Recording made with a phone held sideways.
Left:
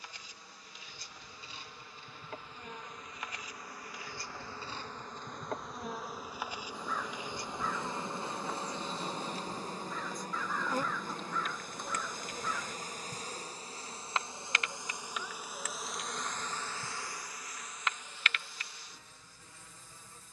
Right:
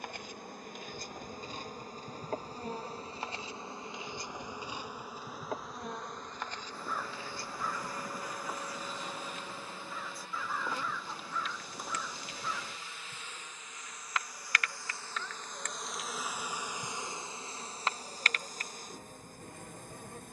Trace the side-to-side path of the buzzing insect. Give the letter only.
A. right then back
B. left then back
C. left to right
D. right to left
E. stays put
B.